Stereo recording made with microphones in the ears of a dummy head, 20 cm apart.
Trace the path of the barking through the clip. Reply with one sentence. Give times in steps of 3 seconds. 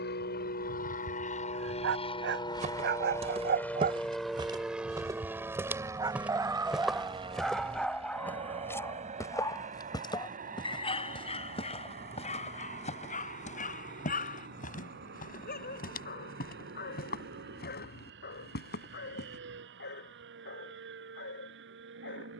You can hear the barking on the right from 0 s, in the centre from 6 s and on the left from 9 s.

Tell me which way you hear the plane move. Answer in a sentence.
You can hear the plane move from left to right.